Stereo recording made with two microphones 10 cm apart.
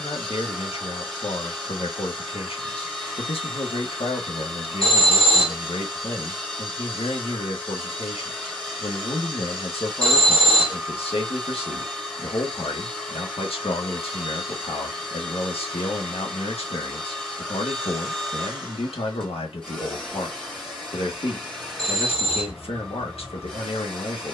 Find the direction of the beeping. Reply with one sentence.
In this clip you hear the beeping on the left.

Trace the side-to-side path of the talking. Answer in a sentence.
In this clip you hear the talking stay put.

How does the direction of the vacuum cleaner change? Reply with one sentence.
In this clip you hear the vacuum cleaner stay in one place.